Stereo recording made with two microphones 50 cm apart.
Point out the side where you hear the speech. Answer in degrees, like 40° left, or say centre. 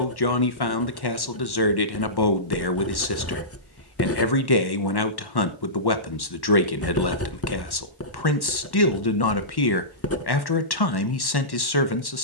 50° left.